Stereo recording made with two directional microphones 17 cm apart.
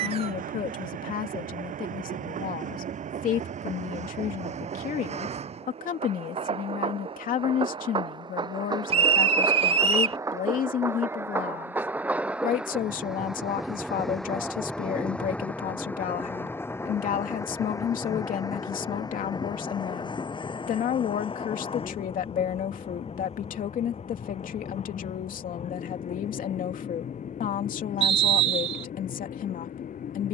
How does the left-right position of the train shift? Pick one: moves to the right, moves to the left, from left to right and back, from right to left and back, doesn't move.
moves to the left.